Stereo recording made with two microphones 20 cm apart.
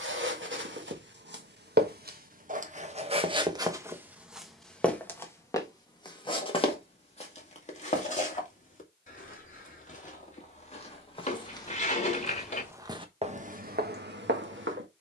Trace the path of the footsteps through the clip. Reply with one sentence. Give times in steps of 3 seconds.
You can hear the footsteps on the right from 0 s, in the centre from 3 s, on the left from 6 s and on the right from 12 s.